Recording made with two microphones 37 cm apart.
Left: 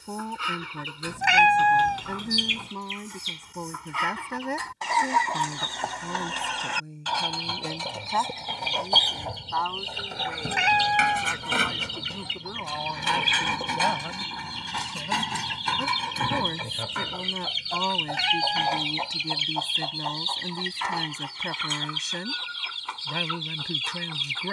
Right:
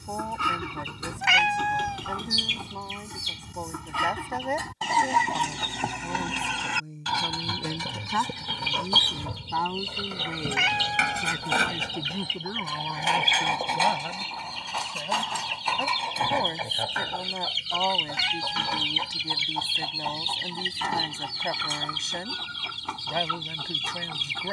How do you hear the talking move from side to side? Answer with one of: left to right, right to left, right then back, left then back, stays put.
right then back.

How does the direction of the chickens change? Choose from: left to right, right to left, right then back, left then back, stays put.
left then back.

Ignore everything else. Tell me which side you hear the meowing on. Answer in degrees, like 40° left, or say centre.
centre.